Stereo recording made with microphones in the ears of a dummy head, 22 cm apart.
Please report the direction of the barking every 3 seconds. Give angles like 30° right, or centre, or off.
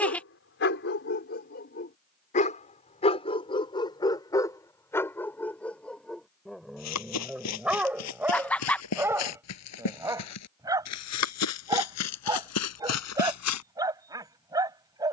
40° left, 10° left, centre, 10° right, 20° right.